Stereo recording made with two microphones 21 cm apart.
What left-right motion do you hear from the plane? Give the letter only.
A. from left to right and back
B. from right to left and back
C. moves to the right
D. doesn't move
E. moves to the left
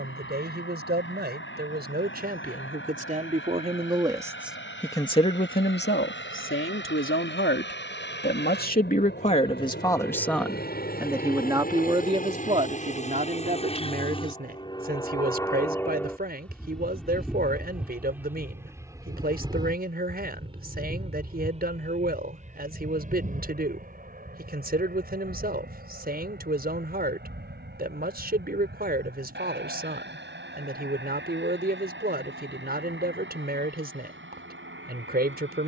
C.